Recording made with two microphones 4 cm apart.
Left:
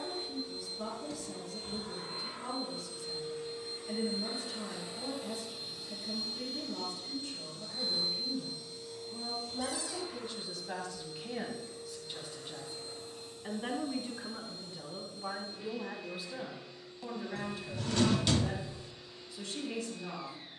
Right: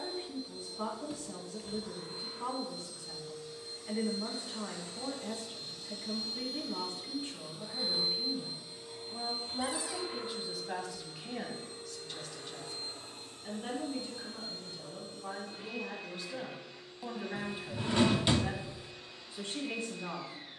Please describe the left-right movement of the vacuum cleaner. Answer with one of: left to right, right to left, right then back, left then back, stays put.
left to right.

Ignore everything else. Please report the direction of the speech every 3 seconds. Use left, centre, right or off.
right, right, right, centre, left, centre, right.